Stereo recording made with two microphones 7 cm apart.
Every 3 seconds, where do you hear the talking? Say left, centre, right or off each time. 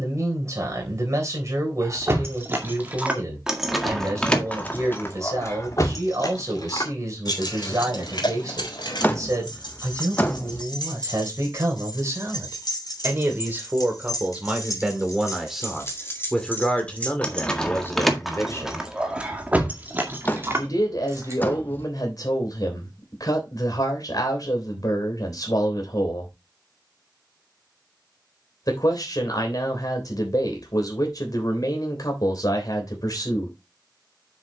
right, right, right, right, right, centre, left, left, left, left, left, left.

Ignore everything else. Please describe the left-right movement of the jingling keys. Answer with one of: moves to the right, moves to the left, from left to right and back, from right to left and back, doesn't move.
from right to left and back.